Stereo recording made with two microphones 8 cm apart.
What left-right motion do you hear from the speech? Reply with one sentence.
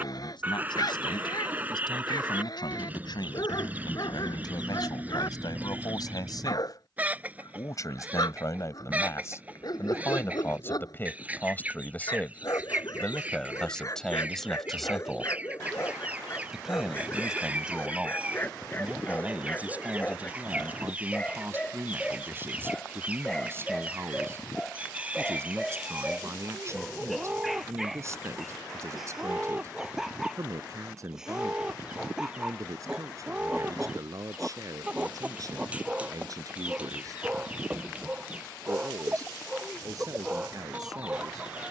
You can hear the speech travel towards the right.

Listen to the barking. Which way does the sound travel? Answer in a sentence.
In this clip you hear the barking go from the left side to the right.